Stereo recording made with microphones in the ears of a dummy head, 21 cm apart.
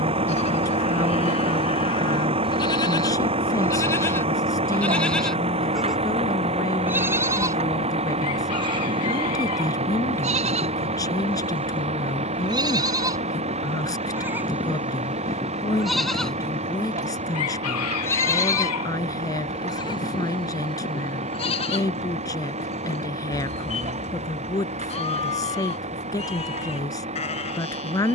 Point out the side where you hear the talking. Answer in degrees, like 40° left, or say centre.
20° left.